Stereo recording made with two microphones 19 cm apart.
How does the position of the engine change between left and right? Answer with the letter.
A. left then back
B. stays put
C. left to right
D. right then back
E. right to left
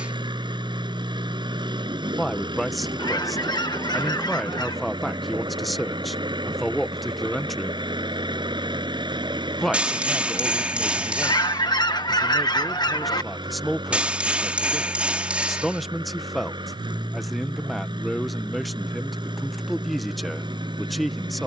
B.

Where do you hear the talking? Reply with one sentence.
In this clip you hear the talking in the centre.